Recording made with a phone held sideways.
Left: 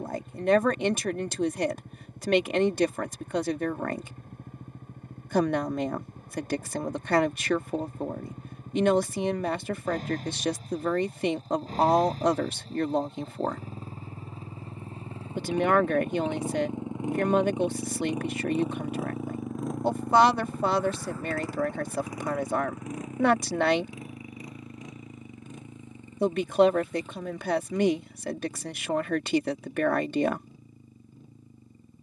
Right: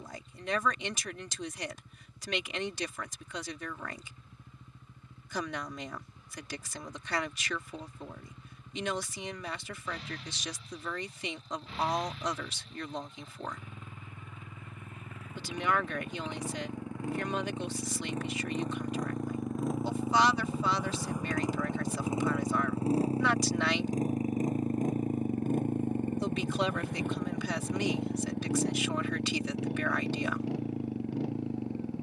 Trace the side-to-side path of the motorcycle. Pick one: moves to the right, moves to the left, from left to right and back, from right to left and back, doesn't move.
moves to the right.